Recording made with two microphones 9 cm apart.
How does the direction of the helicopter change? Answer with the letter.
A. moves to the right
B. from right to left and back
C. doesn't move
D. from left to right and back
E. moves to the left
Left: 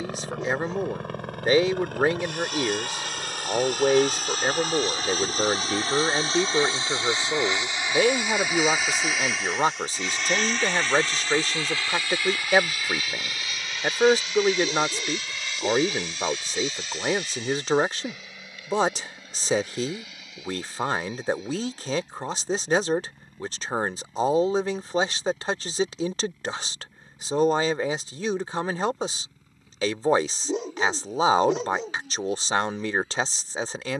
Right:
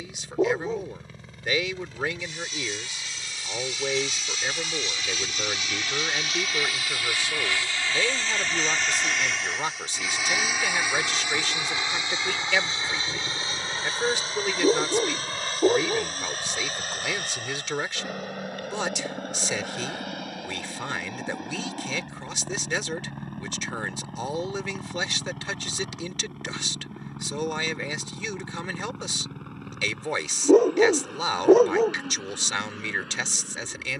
A.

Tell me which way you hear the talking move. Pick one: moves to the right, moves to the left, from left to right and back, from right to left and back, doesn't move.
doesn't move.